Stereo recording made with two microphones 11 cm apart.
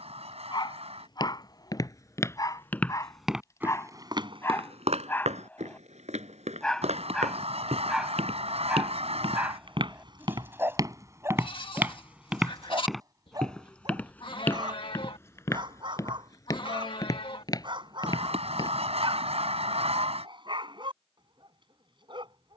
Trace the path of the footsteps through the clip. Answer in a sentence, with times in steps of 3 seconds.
You can hear the footsteps on the left from 0 s, on the right from 3 s, in the centre from 12 s, on the left from 15 s and not at all from 21 s.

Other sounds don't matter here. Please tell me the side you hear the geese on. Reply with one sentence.
You can hear the geese on the right.